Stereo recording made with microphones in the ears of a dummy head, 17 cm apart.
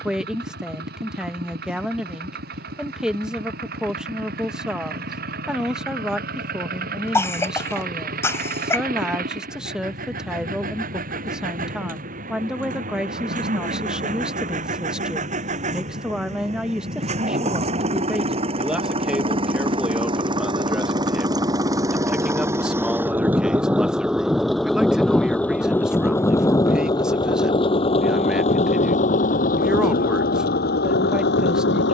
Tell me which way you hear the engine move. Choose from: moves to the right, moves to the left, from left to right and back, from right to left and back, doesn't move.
moves to the left.